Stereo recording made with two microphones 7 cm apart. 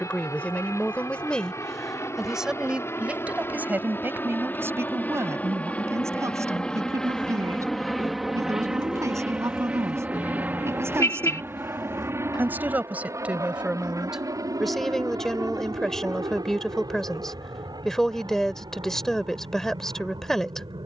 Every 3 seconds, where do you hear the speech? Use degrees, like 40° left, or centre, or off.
10° left, 30° right, 40° right, 40° right, 10° right, 10° left, 10° left.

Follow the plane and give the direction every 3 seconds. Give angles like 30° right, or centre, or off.
50° left, 30° left, 10° left, 20° right, 40° right, 50° right, 60° right.